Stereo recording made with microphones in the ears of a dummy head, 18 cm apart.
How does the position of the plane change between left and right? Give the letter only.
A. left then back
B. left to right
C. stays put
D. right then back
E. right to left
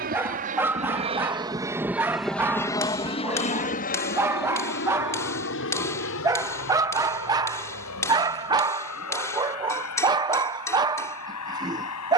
E.